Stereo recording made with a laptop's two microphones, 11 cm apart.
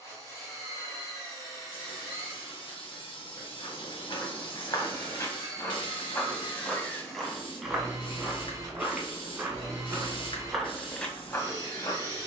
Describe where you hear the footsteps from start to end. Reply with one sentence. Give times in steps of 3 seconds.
You can hear the footsteps not at all from 0 s, on the left from 3 s and in the centre from 6 s.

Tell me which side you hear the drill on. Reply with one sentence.
You can hear the drill on the left.